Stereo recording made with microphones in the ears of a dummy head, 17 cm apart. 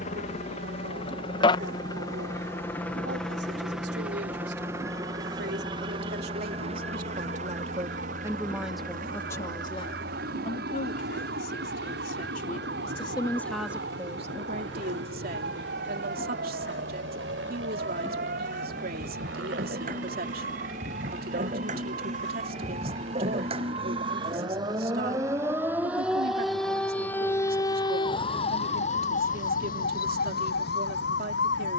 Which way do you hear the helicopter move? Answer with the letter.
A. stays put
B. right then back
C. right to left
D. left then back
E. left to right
E.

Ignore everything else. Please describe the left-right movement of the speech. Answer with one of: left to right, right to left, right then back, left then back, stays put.
left then back.